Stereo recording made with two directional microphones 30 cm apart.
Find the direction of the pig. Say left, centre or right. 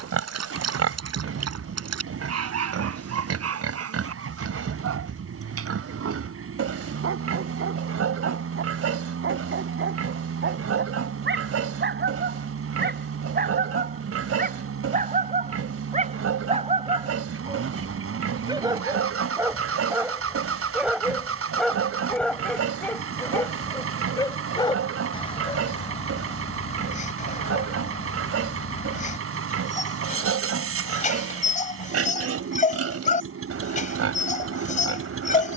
right.